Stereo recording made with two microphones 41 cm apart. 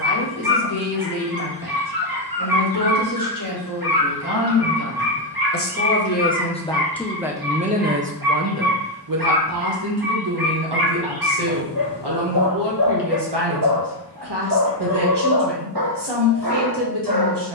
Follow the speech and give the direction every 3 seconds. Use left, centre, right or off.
left, left, centre, right, right, right.